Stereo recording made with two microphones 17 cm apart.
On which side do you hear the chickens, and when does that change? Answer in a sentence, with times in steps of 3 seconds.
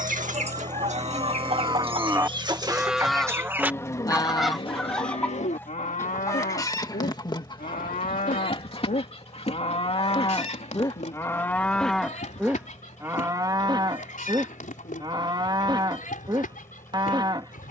You can hear the chickens on the right from 0 s, in the centre from 3 s and on the left from 6 s.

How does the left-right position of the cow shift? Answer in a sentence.
You can hear the cow move from right to left and back again.